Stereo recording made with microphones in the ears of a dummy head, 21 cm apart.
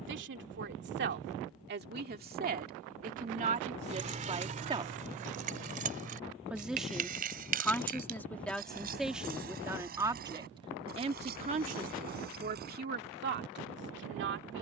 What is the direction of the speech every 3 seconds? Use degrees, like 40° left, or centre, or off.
50° right, 30° right, centre, 20° right, 50° right.